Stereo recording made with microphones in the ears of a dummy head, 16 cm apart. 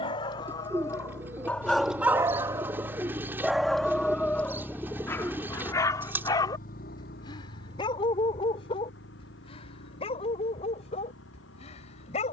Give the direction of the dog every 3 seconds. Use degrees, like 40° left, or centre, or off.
centre, 10° left, 20° left, 30° left.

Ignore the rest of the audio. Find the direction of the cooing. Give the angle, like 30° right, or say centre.
10° right.